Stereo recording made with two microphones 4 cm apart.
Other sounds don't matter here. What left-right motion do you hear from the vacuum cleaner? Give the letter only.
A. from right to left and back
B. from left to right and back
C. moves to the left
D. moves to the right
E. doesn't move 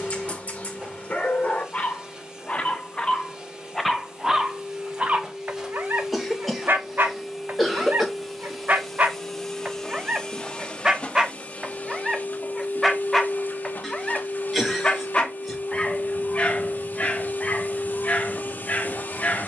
C.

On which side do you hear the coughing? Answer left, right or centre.
centre.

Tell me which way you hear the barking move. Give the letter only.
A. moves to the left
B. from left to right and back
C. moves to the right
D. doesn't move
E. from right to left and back
B.